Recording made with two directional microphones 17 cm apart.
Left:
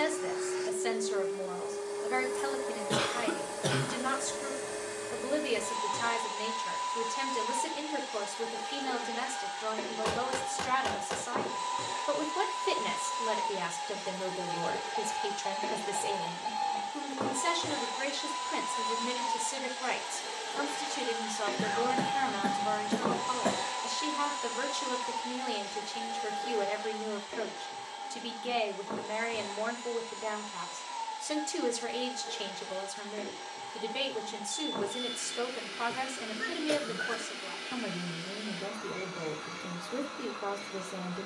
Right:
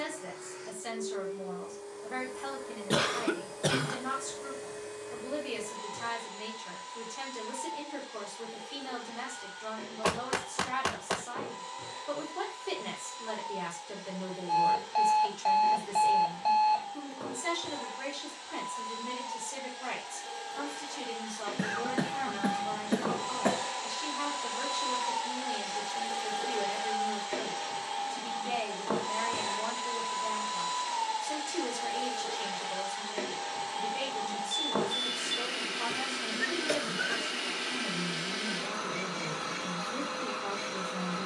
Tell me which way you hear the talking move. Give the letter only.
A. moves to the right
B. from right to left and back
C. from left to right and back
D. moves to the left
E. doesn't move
E.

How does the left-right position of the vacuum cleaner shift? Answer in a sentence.
You can hear the vacuum cleaner move from left to right.